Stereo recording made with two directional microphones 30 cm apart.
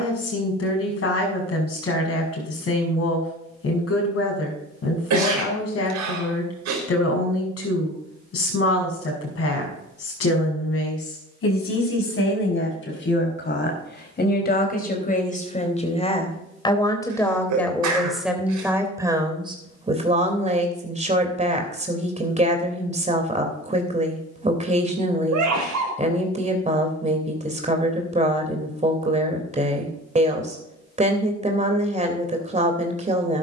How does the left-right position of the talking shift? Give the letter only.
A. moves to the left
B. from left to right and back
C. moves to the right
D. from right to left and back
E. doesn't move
C.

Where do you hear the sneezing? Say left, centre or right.
right.